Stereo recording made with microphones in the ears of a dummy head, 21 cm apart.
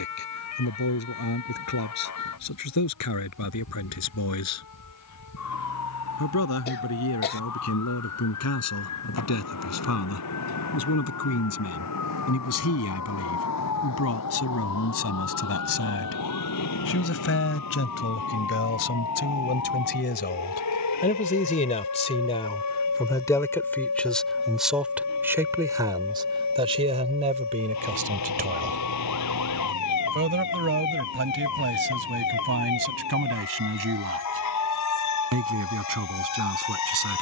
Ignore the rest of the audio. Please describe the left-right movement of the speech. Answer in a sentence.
You can hear the speech travel towards the right.